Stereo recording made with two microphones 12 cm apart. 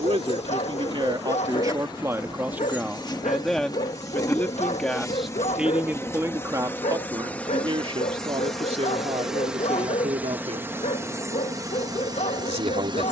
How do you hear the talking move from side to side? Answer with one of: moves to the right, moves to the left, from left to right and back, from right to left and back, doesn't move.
from right to left and back.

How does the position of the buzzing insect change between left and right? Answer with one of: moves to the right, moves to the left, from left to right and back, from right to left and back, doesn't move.
moves to the right.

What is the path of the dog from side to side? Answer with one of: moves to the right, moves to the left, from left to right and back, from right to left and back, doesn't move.
doesn't move.